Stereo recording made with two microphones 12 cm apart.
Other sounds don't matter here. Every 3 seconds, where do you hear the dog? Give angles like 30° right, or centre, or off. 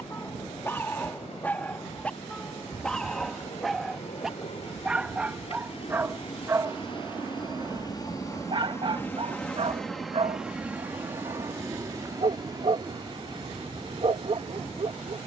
10° left, 10° right, 30° right, 50° right, 50° right.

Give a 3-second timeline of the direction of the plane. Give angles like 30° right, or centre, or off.
80° left, 60° left, 40° left, 10° right, 40° right.